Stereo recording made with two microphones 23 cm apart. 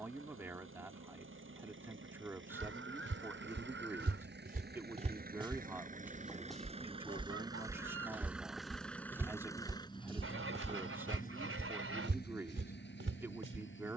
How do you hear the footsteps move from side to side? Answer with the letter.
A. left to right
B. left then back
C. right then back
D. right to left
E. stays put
B.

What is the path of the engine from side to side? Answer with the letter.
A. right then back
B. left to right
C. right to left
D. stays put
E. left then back
C.